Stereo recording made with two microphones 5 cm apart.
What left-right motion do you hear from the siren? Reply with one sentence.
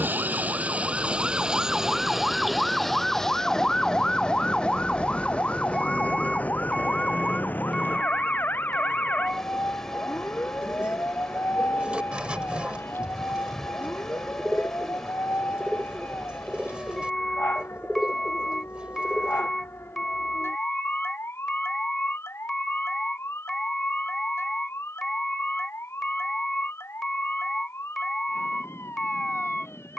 In this clip you hear the siren move from right to left.